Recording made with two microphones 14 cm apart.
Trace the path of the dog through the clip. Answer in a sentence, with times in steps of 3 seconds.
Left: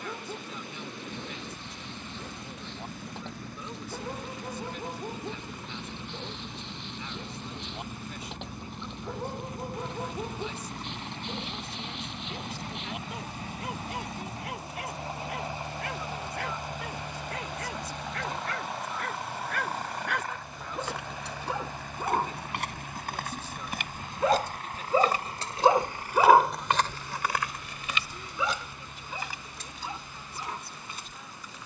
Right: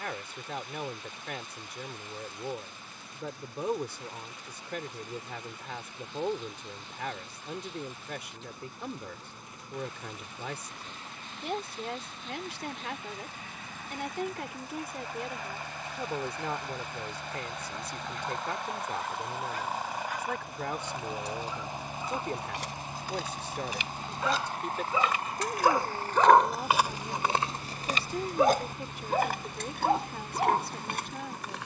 You can hear the dog on the left from 0 s and on the right from 27 s.